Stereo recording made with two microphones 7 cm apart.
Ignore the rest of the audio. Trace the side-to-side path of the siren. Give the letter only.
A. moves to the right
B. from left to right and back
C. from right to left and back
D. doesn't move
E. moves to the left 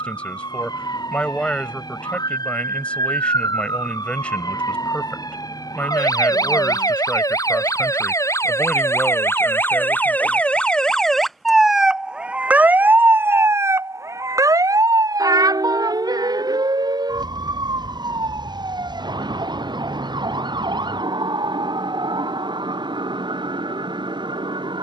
A.